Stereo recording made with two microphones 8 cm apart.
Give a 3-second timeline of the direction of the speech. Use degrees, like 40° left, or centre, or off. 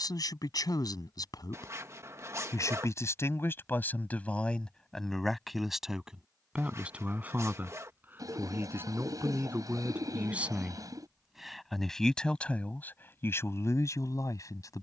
60° left, 20° left, 20° right, 20° right, 30° left.